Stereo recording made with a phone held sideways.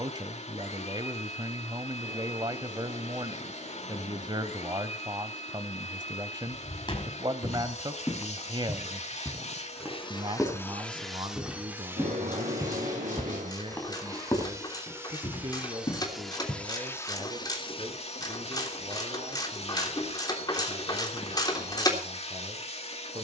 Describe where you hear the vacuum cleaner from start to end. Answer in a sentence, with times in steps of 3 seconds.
You can hear the vacuum cleaner on the left from 0 s, on the right from 12 s, in the centre from 15 s and on the left from 18 s.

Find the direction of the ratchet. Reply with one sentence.
In this clip you hear the ratchet on the left.